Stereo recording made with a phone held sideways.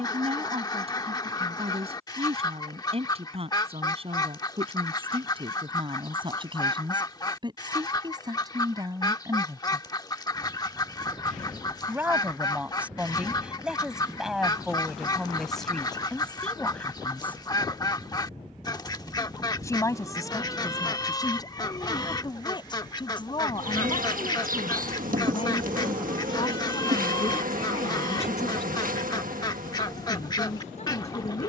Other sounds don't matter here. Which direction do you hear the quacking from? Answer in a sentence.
In this clip you hear the quacking on the left.